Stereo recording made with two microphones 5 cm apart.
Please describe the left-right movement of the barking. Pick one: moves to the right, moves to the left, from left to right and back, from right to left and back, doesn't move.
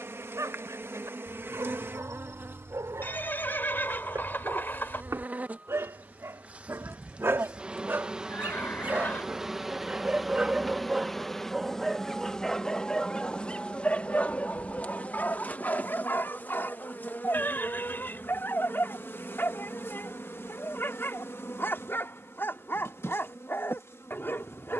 moves to the left.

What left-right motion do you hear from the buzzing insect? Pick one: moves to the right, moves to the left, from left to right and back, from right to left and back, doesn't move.
moves to the left.